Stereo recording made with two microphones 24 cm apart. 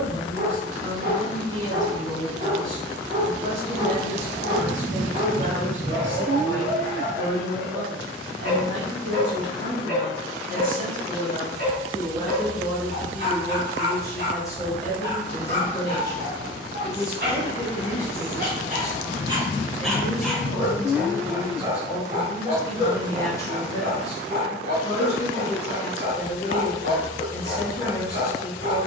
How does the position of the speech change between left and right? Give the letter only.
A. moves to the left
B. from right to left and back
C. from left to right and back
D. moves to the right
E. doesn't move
A.